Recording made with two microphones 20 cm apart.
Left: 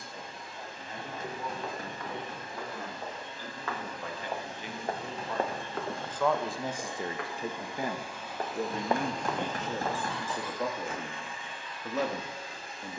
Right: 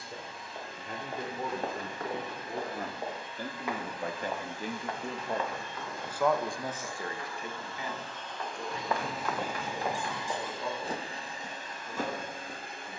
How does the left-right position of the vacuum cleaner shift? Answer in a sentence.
In this clip you hear the vacuum cleaner travel towards the right.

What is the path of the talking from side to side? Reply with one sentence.
In this clip you hear the talking move to the left.